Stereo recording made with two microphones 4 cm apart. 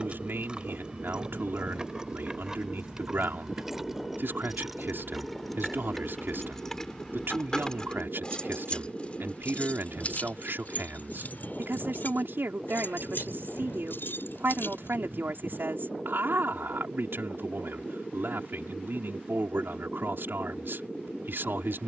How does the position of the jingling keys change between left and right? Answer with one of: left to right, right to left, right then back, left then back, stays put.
right to left.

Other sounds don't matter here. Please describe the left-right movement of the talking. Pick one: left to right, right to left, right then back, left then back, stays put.
stays put.